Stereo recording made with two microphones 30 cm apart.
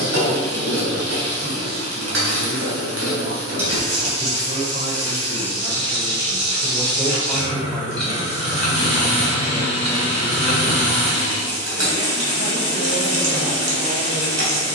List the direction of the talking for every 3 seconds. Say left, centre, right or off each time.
right, right, centre, left, left.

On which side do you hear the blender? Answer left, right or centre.
right.